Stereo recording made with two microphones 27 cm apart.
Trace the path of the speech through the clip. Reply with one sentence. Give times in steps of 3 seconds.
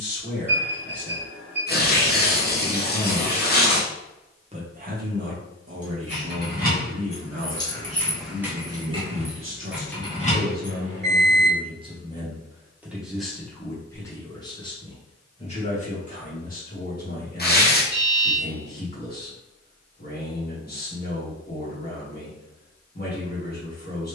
You can hear the speech on the left from 0 s, on the right from 3 s, in the centre from 12 s and on the left from 15 s.